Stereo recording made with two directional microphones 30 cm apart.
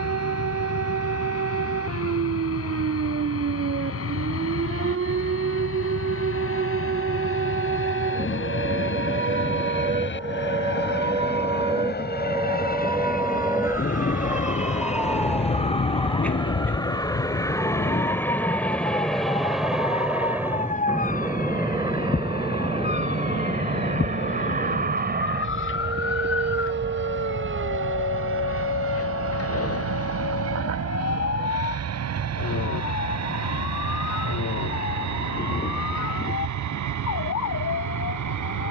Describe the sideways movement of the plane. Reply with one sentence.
In this clip you hear the plane go from the left side to the right.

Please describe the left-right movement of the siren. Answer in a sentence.
In this clip you hear the siren move to the left.